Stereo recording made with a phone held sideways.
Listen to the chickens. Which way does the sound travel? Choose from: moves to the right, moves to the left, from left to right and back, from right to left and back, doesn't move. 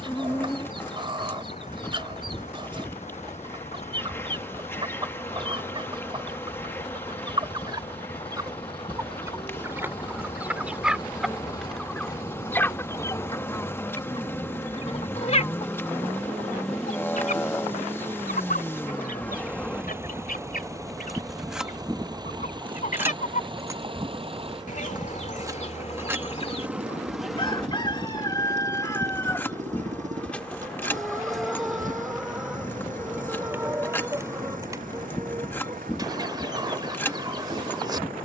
from right to left and back.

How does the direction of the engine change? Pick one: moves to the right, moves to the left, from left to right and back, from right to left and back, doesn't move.
moves to the right.